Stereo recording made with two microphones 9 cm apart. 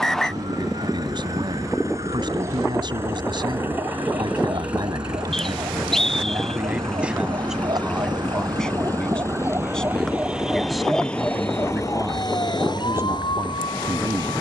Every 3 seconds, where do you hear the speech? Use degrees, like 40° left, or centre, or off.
60° right, 50° right, 10° right, centre, 40° right.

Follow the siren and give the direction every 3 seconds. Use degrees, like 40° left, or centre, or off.
70° right, 60° right, 50° right, centre, 60° left.